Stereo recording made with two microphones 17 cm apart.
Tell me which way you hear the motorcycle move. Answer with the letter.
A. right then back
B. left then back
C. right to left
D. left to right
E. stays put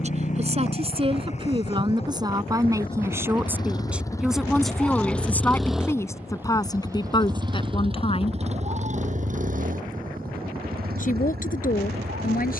D.